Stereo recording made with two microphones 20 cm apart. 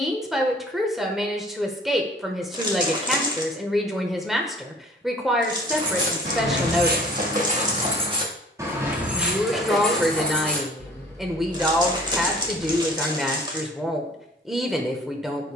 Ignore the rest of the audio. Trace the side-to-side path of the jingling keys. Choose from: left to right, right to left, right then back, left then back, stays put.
right to left.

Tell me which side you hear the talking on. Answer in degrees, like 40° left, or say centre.
centre.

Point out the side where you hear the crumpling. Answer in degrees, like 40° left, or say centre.
20° right.